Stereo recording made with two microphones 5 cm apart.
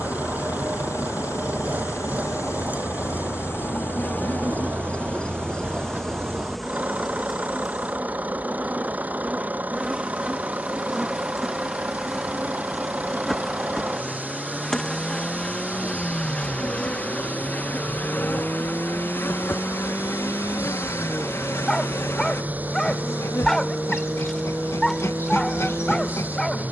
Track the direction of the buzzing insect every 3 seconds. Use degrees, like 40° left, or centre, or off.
70° left, 30° left, centre, 10° right, centre, 20° left, 50° left, 60° left, 60° left.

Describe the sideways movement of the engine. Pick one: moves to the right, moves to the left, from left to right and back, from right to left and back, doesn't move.
doesn't move.